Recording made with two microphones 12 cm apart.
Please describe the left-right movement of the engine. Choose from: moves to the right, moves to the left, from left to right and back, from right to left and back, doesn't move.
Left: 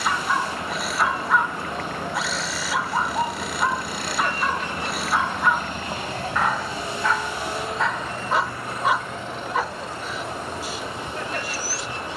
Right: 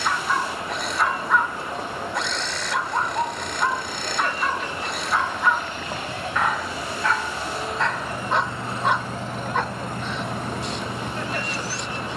moves to the right.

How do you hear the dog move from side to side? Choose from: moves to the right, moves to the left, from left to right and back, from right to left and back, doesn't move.
doesn't move.